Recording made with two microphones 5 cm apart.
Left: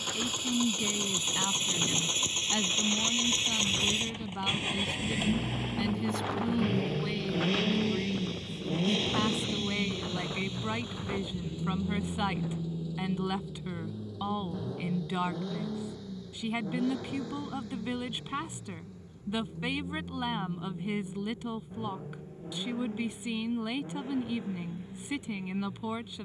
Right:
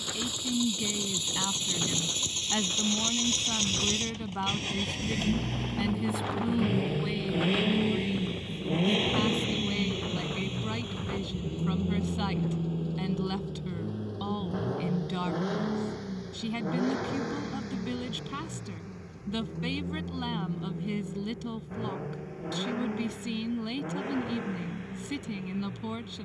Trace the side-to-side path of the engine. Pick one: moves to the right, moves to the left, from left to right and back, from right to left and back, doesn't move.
moves to the right.